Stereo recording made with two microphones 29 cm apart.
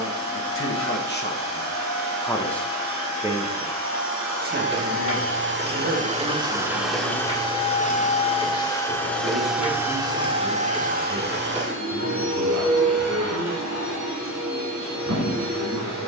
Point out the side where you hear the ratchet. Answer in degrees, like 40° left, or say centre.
20° right.